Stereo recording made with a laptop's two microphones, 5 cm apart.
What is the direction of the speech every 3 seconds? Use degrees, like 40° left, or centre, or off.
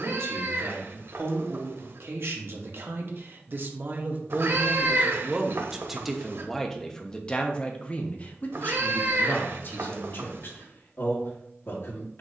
60° right, 30° right, 20° left, 50° left.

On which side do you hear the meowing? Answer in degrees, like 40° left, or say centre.
60° right.